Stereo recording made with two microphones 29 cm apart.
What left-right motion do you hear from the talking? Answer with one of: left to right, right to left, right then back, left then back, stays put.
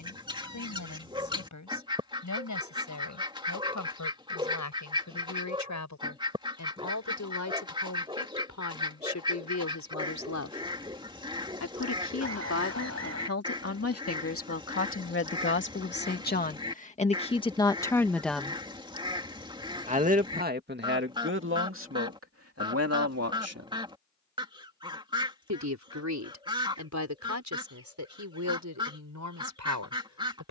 left to right.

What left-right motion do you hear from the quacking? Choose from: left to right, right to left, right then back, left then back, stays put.
stays put.